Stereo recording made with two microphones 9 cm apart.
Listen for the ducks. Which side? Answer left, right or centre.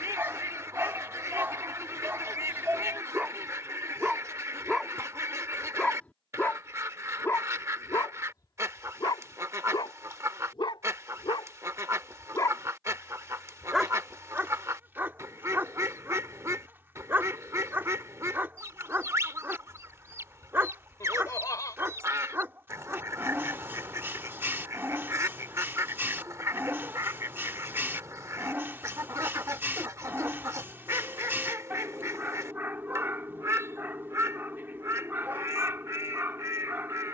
right.